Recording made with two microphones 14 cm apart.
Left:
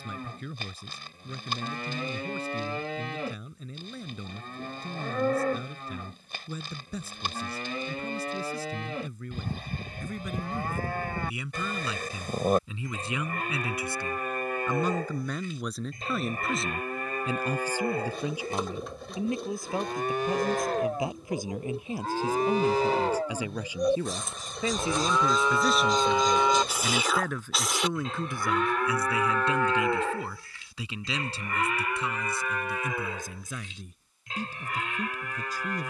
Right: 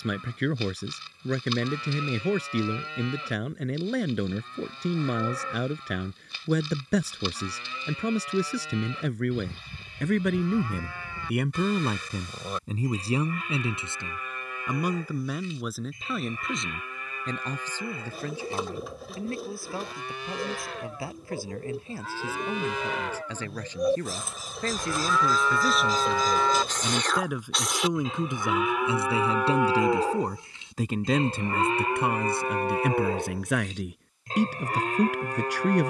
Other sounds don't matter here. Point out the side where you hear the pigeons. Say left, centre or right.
centre.